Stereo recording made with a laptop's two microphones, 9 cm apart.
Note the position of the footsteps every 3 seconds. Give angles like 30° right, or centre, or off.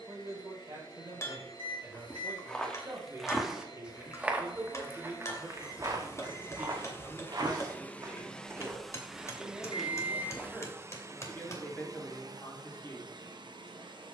10° left, 20° right, 40° right, centre, off.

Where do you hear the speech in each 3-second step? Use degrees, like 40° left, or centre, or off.
40° right, 30° right, 10° right, 10° left, 30° left.